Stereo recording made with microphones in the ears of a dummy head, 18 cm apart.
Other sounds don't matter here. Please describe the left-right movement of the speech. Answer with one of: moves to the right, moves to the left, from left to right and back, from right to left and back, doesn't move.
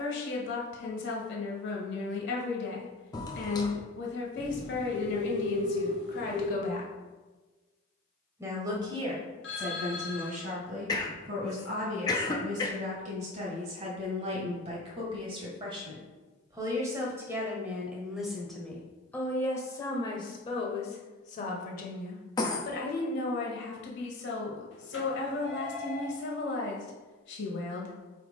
from left to right and back.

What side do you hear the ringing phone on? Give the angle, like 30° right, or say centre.
60° left.